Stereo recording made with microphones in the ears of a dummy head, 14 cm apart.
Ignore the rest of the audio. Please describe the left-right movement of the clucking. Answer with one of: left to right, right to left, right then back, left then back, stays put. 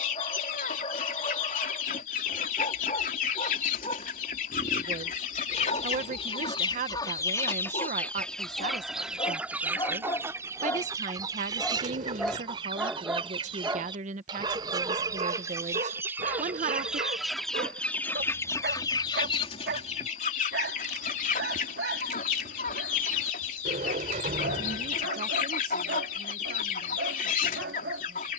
right then back.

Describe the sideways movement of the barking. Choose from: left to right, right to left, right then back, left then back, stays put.
left to right.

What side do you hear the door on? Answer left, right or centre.
right.